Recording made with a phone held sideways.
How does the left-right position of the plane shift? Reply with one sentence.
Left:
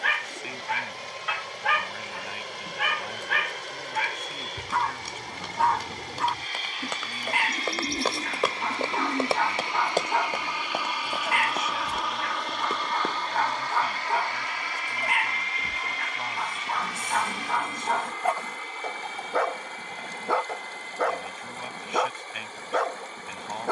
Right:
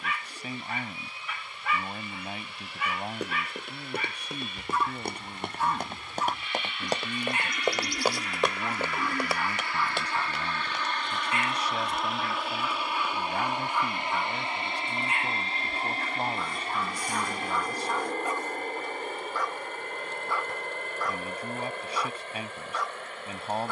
In this clip you hear the plane move from left to right.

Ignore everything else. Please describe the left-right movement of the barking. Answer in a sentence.
In this clip you hear the barking stay in one place.